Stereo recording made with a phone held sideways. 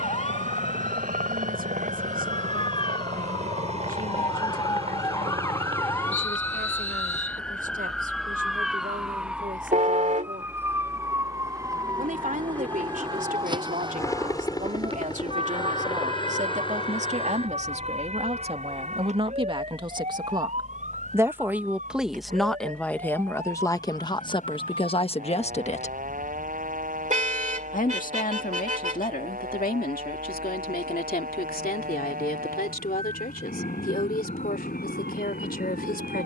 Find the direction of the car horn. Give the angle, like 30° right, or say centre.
50° right.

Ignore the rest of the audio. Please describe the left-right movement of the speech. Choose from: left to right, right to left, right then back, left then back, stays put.
right to left.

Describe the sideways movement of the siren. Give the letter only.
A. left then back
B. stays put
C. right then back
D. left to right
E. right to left
D.